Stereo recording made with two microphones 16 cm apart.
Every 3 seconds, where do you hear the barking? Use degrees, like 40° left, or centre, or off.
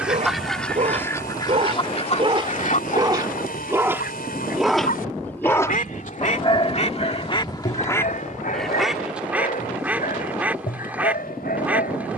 40° right, centre, 50° left, 80° left.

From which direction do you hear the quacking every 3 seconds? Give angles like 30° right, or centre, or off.
30° left, 70° left, 30° left, 10° right.